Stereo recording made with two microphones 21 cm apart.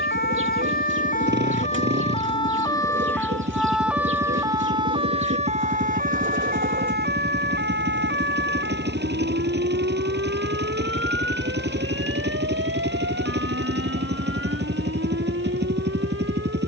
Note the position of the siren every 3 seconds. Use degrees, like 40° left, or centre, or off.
30° left, 10° right, 50° right, 60° right, 70° right, 70° right.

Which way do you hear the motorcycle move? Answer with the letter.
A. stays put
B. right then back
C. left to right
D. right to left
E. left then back
A.